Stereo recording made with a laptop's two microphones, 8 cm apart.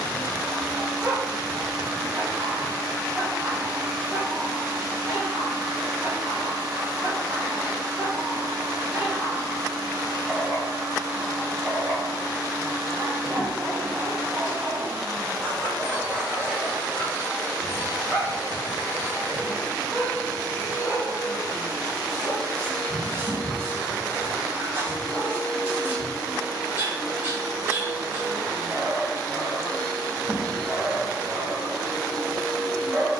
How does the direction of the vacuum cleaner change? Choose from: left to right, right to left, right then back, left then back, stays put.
stays put.